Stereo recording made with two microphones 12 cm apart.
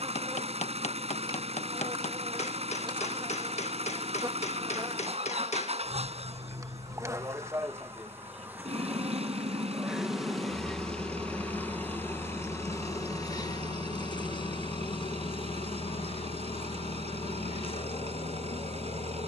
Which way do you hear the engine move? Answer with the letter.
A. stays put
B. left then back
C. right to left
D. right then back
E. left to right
A.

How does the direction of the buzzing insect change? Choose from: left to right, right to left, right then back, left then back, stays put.
right to left.